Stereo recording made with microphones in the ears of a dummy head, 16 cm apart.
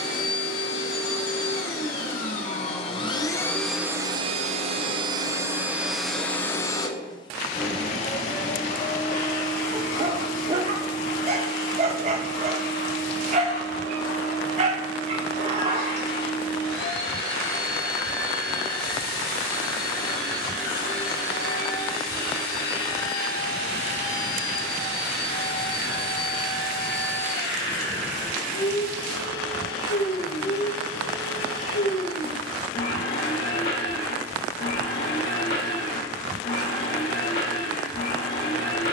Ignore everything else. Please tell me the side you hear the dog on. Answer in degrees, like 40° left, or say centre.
40° right.